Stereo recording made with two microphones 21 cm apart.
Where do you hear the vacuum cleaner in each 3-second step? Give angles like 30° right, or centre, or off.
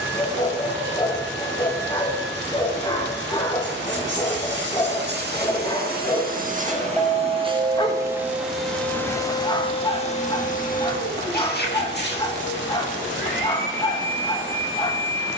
60° right, 60° right, 20° right, 40° left, 60° left.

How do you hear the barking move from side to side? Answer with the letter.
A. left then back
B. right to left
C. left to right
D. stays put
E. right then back
D.